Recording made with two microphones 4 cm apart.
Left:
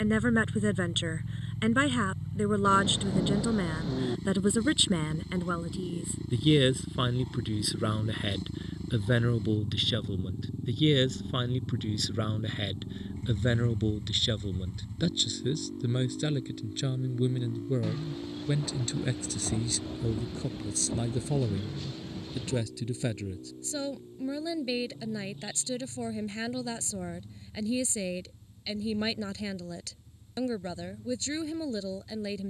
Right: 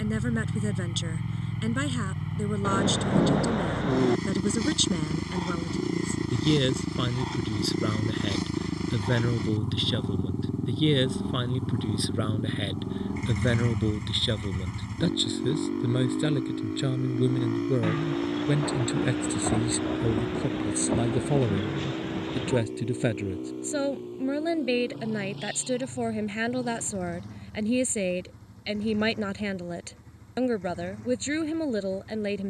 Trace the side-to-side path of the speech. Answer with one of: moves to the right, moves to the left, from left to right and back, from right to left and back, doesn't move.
moves to the right.